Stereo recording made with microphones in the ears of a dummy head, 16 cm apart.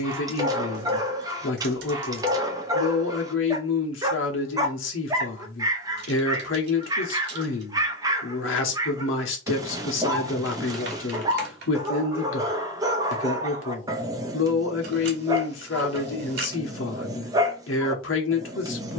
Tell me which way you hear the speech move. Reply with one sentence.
In this clip you hear the speech stay in one place.